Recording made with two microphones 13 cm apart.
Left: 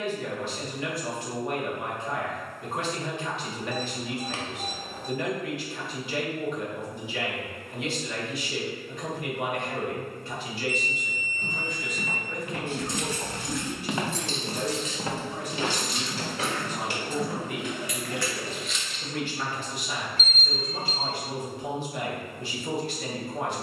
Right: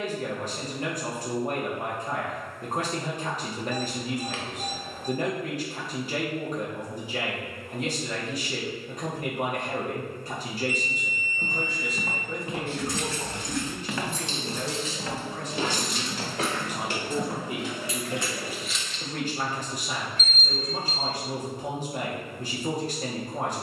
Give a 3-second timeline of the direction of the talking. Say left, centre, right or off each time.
right, right, right, right, centre, centre, right, right.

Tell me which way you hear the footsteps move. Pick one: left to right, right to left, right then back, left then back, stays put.
left then back.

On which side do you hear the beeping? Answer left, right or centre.
left.